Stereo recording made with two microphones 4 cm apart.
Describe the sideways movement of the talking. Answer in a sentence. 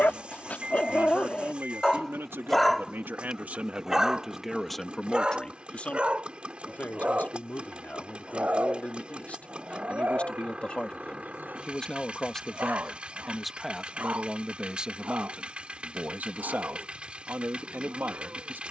You can hear the talking move from right to left and back again.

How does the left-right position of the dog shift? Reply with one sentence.
In this clip you hear the dog move from left to right.